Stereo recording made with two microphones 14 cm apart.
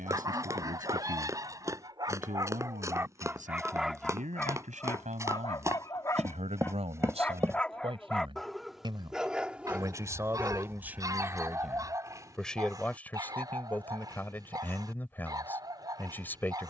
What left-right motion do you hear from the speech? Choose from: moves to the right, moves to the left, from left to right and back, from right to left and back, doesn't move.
moves to the left.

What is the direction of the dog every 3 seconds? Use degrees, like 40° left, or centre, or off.
30° right, 10° left, 10° left, 10° right, 30° right, 30° right.